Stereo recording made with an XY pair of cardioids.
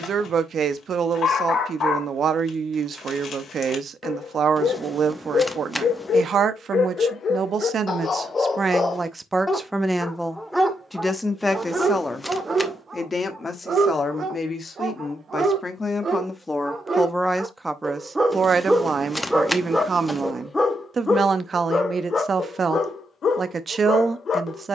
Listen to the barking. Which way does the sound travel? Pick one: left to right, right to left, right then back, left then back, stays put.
right then back.